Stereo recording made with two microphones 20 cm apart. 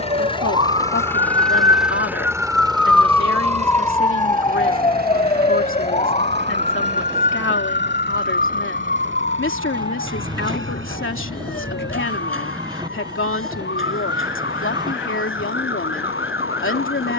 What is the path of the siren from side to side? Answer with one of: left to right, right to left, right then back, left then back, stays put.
right to left.